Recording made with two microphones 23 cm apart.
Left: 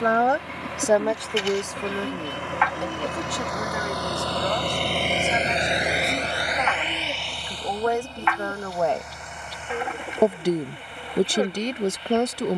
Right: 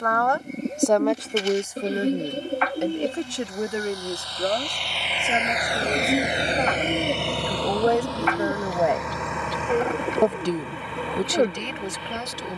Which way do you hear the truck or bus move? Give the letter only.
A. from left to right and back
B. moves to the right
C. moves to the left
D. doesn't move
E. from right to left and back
B.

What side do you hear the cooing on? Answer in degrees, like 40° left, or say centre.
40° right.